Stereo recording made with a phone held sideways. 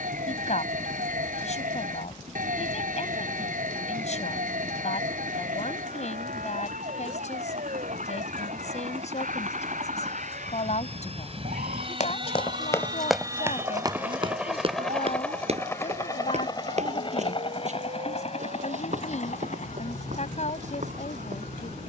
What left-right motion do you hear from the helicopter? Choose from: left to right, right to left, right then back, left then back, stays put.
right to left.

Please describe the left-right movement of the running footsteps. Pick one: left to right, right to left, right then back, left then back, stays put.
left to right.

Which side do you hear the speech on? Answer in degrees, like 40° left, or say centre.
60° left.